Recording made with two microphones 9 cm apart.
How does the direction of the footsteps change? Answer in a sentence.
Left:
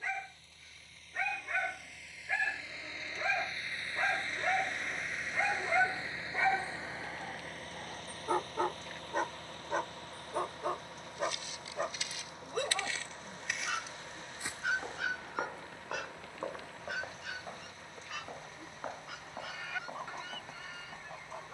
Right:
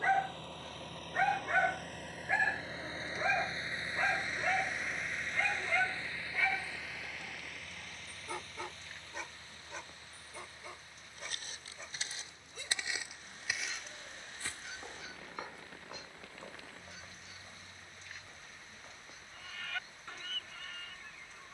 In this clip you hear the footsteps move to the left.